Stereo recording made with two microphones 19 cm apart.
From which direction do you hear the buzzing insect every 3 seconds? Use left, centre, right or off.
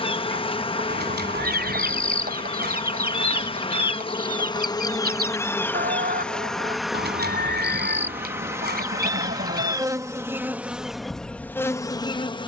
left, left, centre, centre.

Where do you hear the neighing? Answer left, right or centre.
right.